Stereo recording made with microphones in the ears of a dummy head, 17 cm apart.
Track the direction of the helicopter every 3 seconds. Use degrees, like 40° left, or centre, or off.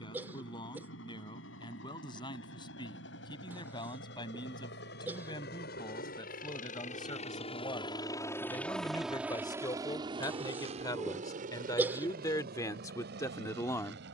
80° left, 70° left, 30° left, 30° right, 50° right.